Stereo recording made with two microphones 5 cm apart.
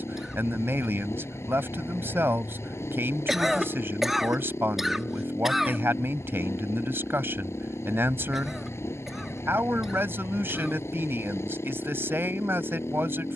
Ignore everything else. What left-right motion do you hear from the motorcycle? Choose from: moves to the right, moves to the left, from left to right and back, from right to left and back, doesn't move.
doesn't move.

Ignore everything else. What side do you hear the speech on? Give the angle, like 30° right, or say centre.
50° right.